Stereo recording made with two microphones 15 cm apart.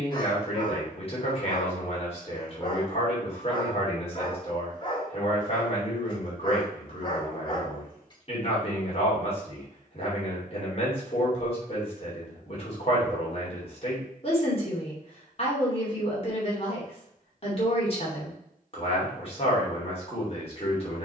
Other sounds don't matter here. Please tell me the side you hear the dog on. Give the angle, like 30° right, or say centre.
30° left.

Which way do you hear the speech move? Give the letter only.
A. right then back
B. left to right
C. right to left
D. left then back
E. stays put
E.